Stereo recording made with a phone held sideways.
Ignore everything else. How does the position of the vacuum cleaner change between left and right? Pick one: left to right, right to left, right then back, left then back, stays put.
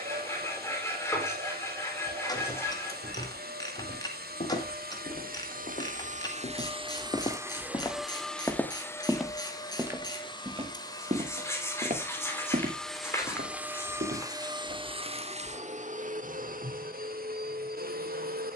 left then back.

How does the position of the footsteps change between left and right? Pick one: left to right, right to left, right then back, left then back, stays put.
left to right.